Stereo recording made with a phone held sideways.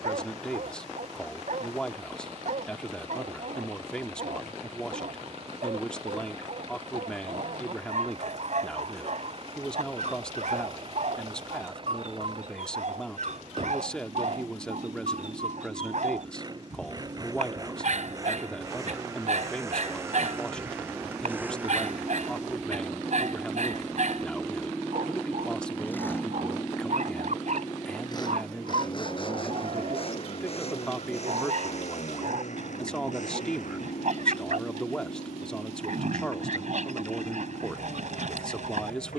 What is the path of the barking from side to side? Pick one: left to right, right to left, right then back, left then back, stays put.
stays put.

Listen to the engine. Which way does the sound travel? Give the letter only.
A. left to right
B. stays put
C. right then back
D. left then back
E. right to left
E.